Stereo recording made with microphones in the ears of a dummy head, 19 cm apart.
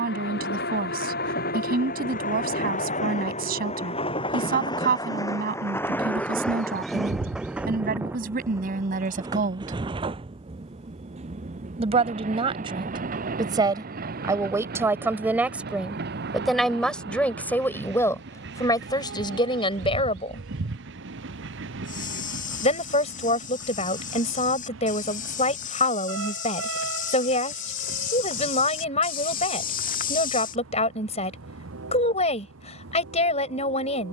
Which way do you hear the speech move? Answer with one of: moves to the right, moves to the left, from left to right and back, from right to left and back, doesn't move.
moves to the left.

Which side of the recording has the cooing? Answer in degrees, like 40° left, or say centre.
70° right.